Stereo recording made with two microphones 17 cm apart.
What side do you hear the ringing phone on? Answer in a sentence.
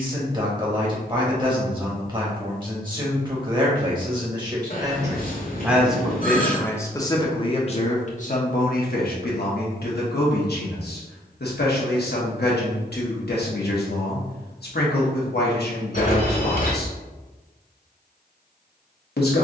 You can hear the ringing phone on the left.